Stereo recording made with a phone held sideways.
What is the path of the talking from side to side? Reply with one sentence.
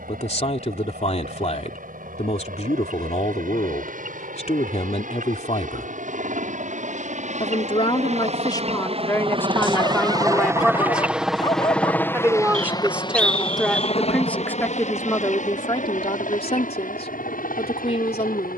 You can hear the talking go right and come back.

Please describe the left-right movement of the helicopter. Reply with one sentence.
In this clip you hear the helicopter move from right to left.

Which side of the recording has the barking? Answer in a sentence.
In this clip you hear the barking on the left.